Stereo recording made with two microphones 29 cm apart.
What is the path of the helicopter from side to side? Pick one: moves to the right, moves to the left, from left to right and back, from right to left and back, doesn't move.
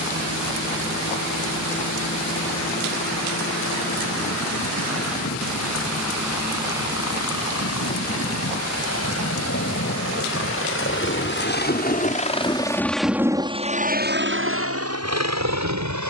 moves to the right.